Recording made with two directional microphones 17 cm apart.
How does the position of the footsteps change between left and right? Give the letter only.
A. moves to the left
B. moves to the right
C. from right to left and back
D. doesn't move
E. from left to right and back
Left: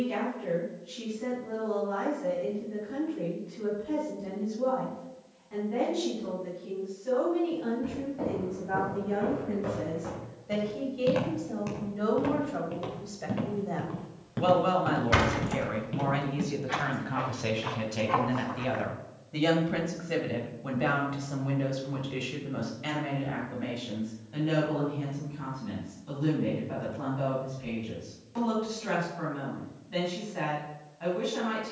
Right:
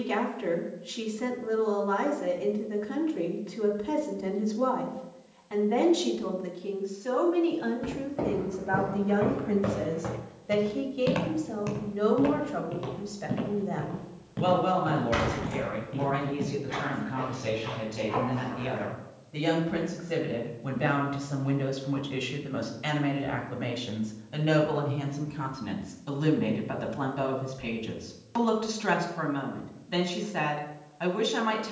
A.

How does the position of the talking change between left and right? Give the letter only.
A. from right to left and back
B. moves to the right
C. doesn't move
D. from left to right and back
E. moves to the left
A.